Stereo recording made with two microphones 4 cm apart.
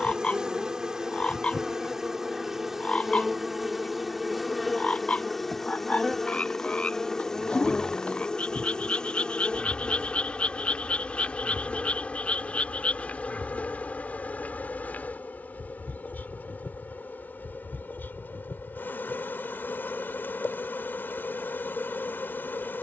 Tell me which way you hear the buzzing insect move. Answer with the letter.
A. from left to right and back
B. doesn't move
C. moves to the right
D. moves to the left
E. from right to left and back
D.